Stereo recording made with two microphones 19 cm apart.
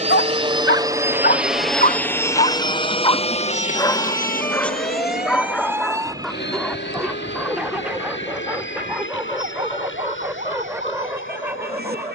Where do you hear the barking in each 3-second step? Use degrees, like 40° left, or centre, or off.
50° left, 10° left, centre, 10° right.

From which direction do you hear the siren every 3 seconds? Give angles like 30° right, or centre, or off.
50° left, 10° left, 30° right, 50° right.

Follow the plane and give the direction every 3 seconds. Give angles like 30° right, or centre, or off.
centre, 40° left, 60° left, 70° left.